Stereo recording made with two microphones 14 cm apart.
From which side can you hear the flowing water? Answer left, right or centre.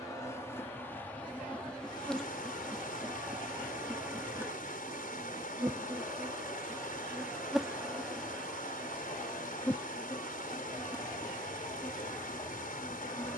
left.